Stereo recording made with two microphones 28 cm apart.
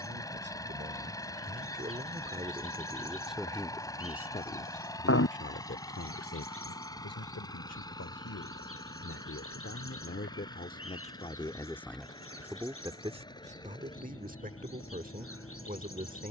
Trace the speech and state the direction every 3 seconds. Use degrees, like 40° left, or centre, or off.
30° right, 20° left, 60° left, 30° left, 20° right, 30° right.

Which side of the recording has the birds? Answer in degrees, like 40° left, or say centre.
50° left.